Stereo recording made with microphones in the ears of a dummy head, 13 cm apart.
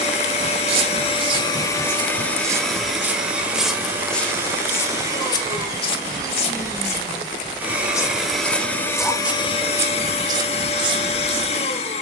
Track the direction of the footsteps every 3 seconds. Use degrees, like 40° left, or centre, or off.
30° right, 10° left, 30° left, 30° right.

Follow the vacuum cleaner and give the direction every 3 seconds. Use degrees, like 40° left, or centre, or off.
30° left, 20° right, 10° right, 40° left.